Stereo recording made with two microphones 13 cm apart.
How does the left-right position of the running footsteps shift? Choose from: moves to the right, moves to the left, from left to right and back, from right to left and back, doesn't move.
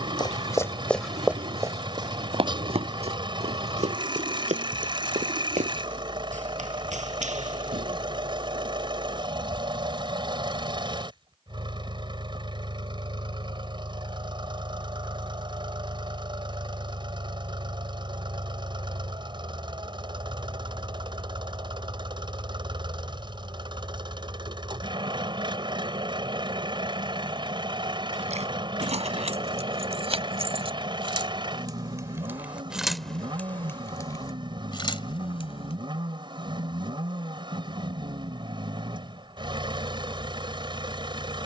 moves to the right.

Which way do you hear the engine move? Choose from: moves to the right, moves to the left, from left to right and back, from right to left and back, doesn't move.
doesn't move.